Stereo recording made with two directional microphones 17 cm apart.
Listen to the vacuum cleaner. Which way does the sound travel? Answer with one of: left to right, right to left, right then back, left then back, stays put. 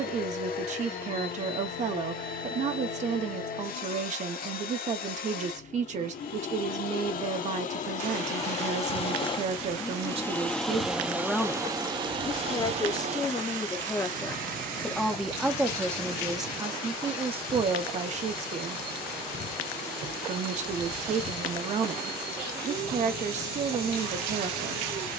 left to right.